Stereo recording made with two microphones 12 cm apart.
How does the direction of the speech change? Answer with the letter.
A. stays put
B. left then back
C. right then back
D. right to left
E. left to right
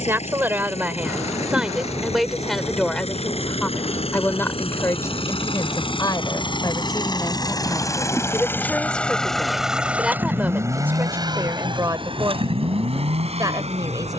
B.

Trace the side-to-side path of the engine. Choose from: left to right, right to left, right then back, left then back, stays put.
left to right.